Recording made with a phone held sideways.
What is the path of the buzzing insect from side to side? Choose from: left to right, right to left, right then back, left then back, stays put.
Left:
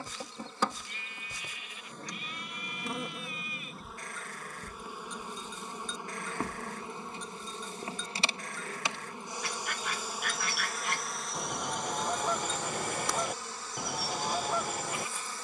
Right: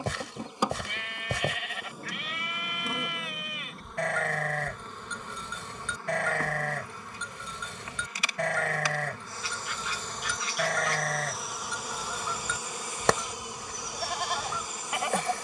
left then back.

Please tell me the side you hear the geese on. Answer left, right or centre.
left.